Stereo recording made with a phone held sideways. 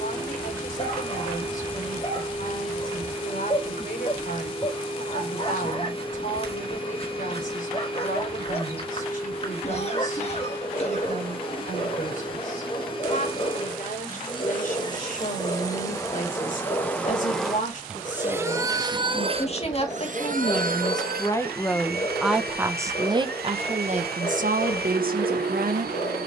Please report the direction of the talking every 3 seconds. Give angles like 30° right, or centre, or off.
60° left, 60° left, 60° left, 60° left, 60° left, 50° left, 40° left, 10° right, 60° right.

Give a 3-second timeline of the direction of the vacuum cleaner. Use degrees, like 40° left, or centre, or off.
30° left, 30° left, 30° left, 30° left, 30° left, 20° left, 40° right, 80° right, 80° right.